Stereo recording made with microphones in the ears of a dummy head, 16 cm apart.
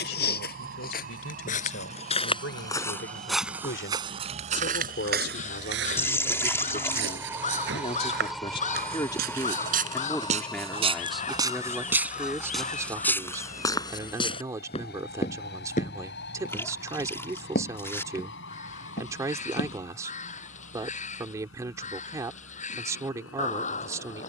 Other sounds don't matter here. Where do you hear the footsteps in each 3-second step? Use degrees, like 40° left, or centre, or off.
40° left, 30° right, 60° right, 30° right, 10° left, 50° left, 60° left, off.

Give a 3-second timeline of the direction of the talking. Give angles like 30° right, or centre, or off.
80° left, 60° left, 40° left, 10° left, 10° right, 20° right, 20° right, 20° right.